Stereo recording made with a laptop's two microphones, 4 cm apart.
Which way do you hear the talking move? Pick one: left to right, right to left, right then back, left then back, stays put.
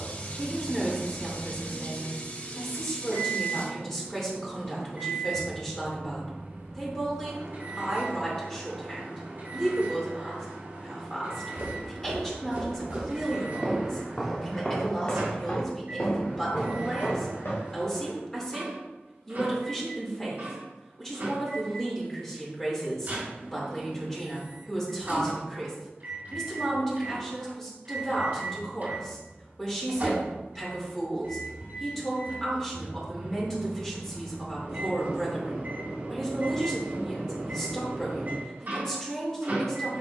stays put.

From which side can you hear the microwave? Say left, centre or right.
right.